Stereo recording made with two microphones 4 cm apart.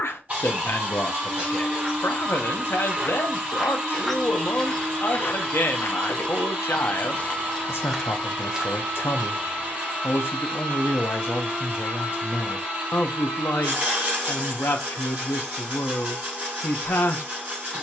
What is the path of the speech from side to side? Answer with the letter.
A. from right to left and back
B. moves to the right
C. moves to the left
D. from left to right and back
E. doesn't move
E.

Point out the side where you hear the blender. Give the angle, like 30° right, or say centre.
40° right.